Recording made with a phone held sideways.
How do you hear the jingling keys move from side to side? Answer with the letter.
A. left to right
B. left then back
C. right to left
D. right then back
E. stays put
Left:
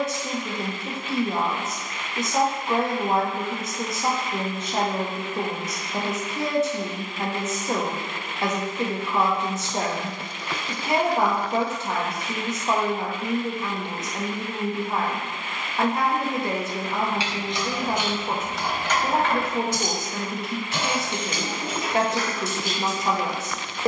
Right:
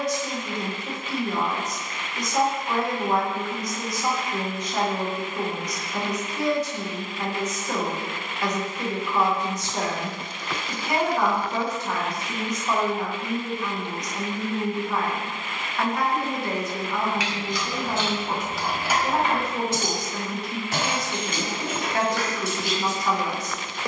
A.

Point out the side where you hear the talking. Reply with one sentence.
In this clip you hear the talking on the left.